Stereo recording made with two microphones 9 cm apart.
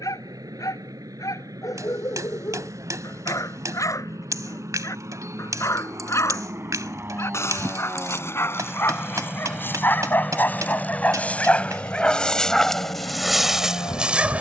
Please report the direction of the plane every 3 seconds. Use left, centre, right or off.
right, right, right, centre, left.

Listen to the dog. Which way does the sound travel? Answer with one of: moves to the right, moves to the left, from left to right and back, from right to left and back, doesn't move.
moves to the right.